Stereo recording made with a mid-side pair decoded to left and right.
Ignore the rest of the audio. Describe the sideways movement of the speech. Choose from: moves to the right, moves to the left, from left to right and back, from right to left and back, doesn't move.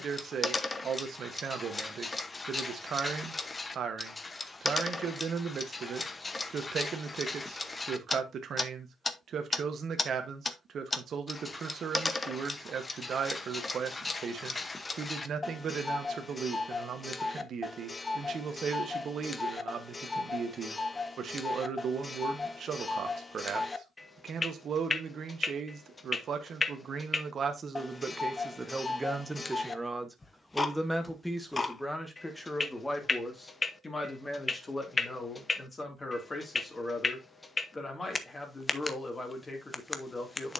moves to the left.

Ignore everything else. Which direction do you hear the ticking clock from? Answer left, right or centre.
left.